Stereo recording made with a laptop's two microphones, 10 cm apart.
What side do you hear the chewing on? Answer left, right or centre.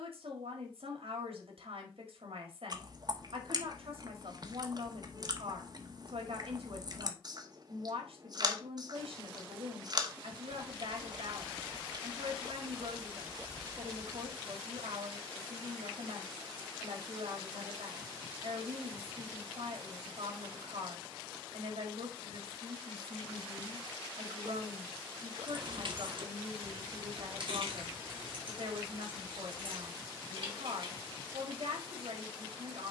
right.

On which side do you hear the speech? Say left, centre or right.
right.